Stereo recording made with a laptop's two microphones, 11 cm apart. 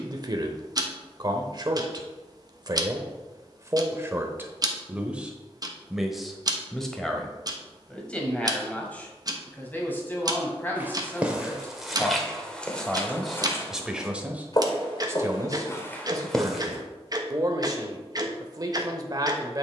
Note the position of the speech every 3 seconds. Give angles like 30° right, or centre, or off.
40° right, 20° right, 10° left, 20° left, centre, 30° right, 40° right.